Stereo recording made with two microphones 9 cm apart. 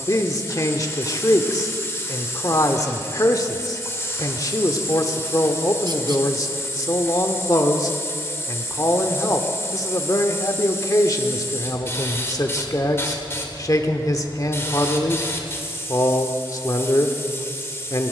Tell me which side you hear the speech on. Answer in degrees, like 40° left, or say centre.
40° left.